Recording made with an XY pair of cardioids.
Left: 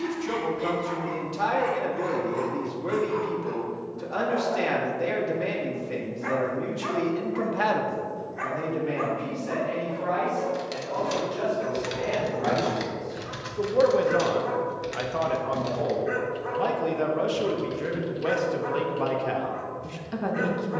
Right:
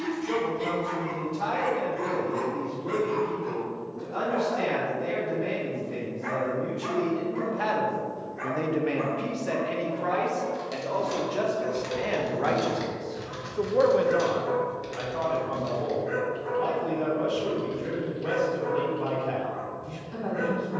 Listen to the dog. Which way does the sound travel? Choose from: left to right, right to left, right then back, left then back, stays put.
right to left.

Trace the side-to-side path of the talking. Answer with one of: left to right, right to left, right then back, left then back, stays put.
right then back.